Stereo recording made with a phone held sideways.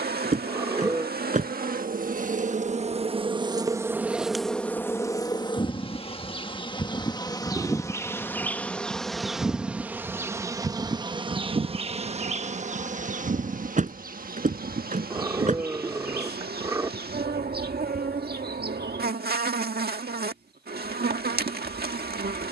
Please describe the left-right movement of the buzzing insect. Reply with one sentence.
You can hear the buzzing insect move from right to left and back again.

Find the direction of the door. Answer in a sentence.
In this clip you hear the door on the right.